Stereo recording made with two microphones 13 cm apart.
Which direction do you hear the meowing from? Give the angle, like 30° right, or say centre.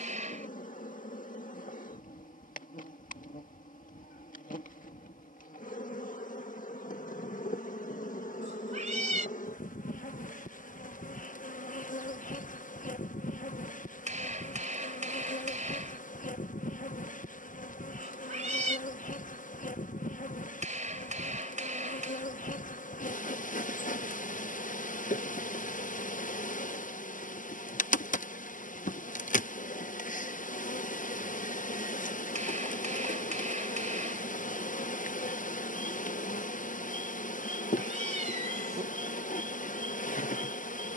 60° right.